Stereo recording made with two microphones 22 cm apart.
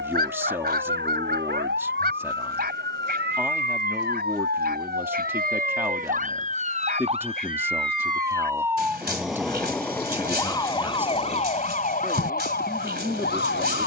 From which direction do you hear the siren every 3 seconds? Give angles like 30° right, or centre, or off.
60° right, 50° right, 20° right, 20° left, 50° left.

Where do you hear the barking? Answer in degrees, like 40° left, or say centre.
50° right.